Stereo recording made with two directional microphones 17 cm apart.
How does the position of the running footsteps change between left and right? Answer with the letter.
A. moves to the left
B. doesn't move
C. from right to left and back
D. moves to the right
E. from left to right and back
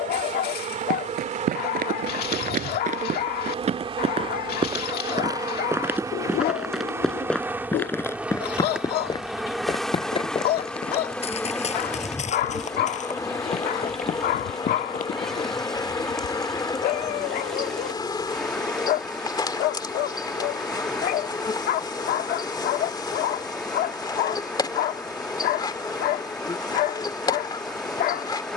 A.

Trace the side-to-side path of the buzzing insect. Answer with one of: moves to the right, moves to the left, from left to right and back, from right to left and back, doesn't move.
moves to the left.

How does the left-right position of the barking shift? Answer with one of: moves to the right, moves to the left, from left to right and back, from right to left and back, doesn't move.
doesn't move.